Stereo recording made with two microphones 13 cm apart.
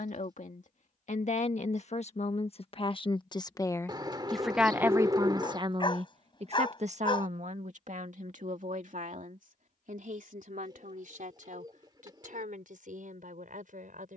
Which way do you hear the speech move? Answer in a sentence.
In this clip you hear the speech go from the left side to the right.